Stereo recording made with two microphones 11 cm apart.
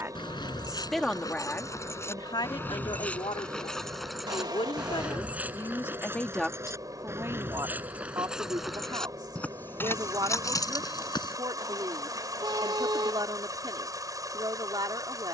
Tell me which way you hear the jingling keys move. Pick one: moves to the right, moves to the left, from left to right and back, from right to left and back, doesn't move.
from left to right and back.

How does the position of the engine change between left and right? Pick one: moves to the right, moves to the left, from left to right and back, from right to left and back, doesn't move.
doesn't move.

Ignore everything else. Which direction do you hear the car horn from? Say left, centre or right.
right.